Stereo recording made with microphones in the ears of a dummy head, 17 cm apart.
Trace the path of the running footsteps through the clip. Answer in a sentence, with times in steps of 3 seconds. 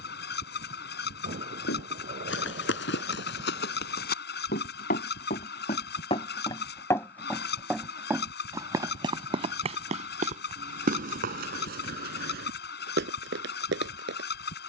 You can hear the running footsteps on the left from 0 s, in the centre from 6 s and on the right from 9 s.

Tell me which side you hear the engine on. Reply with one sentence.
You can hear the engine on the left.